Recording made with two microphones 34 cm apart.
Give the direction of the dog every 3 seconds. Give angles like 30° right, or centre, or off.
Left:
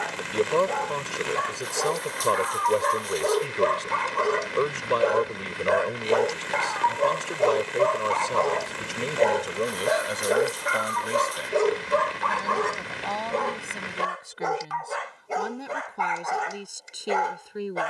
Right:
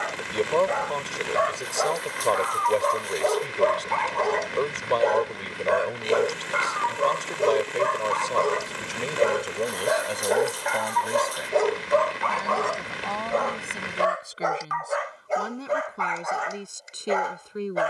40° left, 10° left, 20° right, 10° left, 40° left, 50° left.